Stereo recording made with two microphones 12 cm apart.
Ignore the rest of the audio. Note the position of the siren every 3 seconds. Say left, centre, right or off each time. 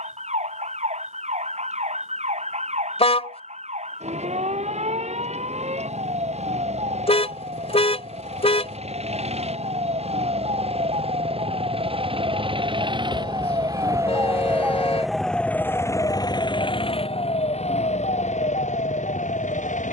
right, right, right, right, right, left, left.